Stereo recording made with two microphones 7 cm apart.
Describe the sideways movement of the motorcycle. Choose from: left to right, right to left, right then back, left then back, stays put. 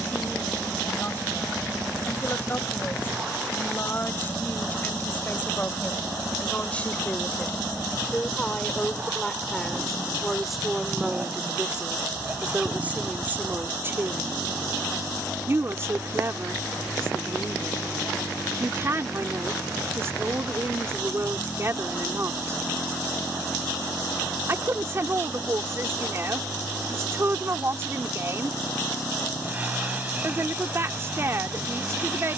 stays put.